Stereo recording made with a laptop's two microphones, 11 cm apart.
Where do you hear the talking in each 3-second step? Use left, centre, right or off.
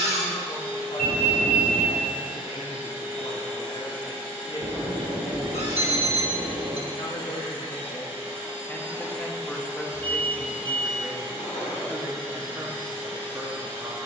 left, left, left, centre, right.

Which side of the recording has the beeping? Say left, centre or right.
right.